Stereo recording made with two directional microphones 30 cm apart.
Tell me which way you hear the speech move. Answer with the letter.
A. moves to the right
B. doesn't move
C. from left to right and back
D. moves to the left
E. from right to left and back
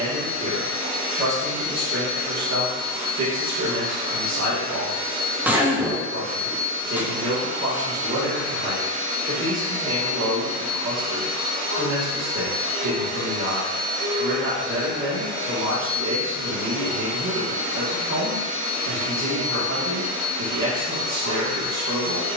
B.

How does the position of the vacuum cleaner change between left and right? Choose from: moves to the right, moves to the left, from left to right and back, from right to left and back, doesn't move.
doesn't move.